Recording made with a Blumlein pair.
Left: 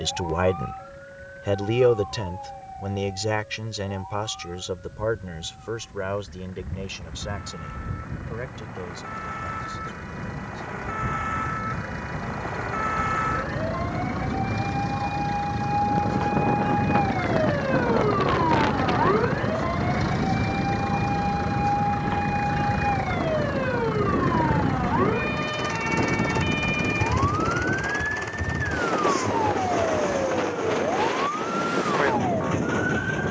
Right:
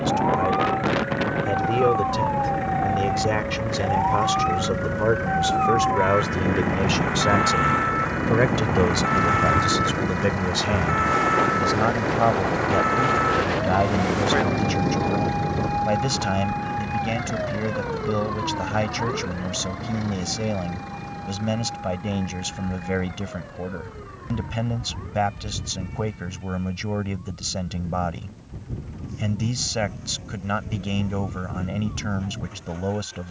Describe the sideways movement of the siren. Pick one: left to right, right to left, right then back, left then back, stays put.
right to left.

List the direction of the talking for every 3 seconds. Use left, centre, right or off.
centre, centre, right, right, right, right, right, right, right, right, right.